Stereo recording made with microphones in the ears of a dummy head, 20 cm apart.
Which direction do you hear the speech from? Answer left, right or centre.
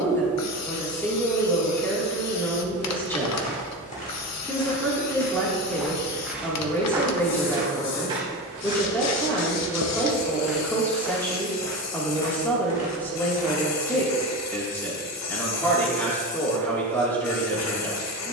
centre.